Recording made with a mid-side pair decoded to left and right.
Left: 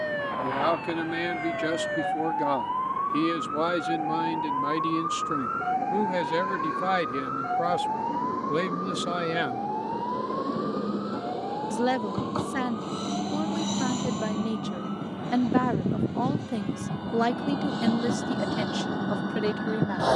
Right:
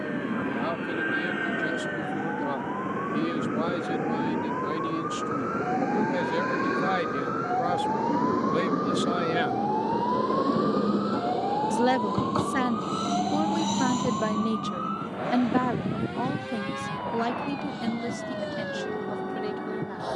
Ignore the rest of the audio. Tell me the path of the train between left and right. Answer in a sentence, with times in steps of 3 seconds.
In this clip you hear the train on the right from 0 s, in the centre from 12 s and on the left from 15 s.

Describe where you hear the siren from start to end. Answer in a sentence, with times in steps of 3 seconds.
In this clip you hear the siren on the left from 0 s, in the centre from 6 s and on the right from 9 s.